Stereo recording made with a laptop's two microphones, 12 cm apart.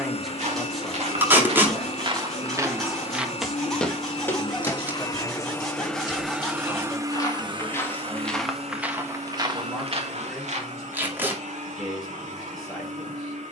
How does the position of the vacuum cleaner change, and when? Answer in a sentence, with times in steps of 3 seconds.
In this clip you hear the vacuum cleaner on the left from 0 s and on the right from 6 s.